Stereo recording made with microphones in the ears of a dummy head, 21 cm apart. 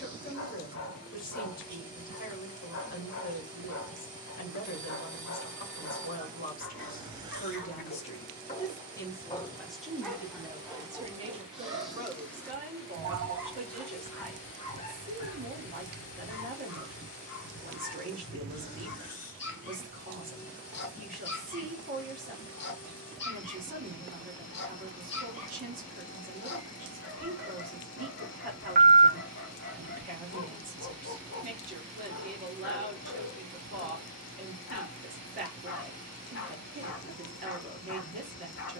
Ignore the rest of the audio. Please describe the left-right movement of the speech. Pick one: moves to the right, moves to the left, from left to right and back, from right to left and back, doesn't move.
moves to the right.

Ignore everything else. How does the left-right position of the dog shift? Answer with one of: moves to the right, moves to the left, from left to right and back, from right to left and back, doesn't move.
from left to right and back.